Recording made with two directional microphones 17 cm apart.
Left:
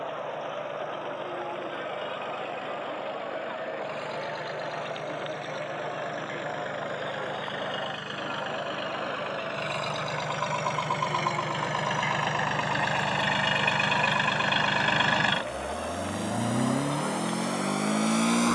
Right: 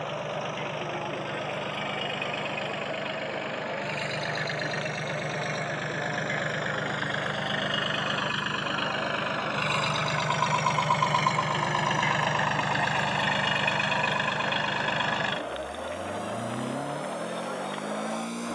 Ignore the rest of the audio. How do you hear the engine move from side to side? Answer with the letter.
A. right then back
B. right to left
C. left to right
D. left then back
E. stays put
B.